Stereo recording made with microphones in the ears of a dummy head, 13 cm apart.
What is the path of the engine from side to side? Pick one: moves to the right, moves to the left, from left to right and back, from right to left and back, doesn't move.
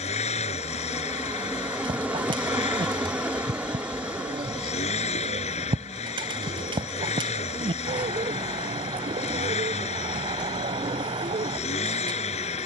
doesn't move.